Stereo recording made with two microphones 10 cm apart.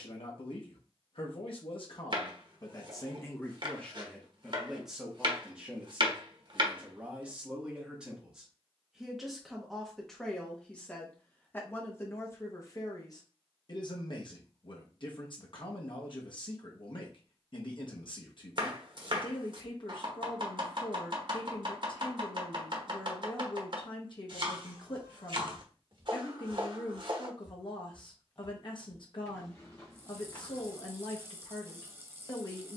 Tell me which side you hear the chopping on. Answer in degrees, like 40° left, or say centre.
50° right.